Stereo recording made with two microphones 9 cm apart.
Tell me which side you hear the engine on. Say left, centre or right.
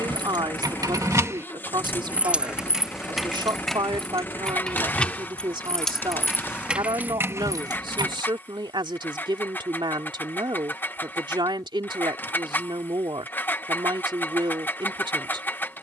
left.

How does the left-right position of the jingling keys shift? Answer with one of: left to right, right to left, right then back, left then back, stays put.
left then back.